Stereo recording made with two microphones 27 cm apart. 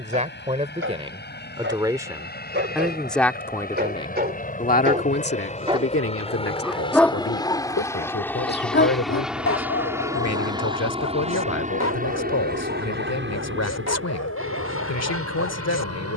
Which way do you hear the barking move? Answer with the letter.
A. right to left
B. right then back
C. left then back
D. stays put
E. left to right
A.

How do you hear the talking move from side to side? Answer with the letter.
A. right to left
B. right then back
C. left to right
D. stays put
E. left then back
A.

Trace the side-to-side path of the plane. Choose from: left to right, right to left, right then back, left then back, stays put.
left to right.